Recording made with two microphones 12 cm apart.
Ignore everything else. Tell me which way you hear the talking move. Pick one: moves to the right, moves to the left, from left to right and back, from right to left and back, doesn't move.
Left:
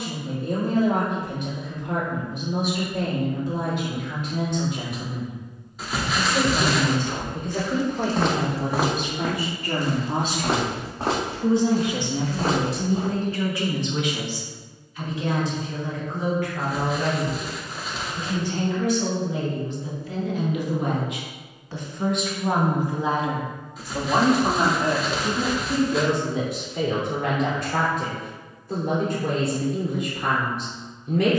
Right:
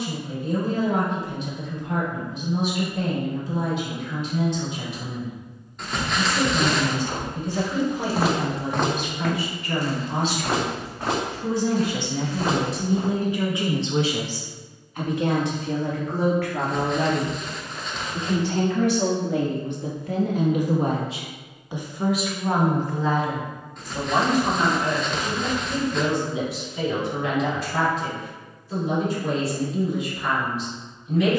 from left to right and back.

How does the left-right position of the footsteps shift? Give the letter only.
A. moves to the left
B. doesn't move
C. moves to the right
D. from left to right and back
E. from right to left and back
A.